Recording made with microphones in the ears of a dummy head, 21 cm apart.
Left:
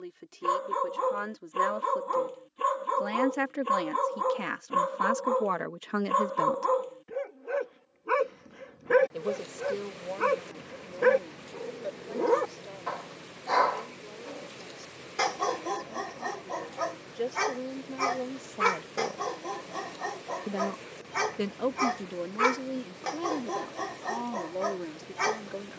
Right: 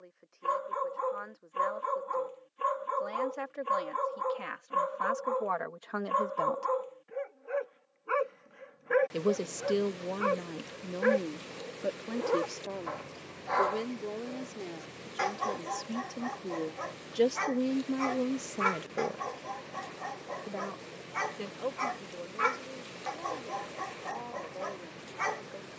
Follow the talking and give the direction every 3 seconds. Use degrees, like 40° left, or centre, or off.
70° left, 50° left, 30° left, 50° right, 60° right, 50° right, 10° right, 60° left, 70° left.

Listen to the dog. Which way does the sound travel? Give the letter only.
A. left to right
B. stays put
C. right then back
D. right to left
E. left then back
B.